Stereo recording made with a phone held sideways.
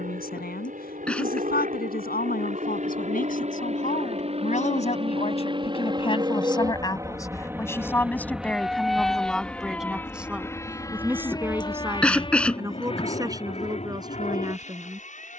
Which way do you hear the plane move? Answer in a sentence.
You can hear the plane go from the right side to the left.